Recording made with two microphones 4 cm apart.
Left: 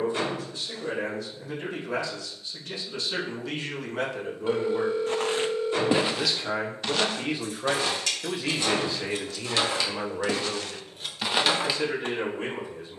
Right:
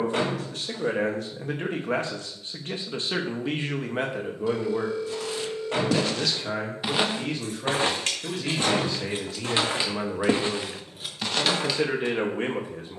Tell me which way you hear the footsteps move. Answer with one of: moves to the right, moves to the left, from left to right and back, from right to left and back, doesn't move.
from left to right and back.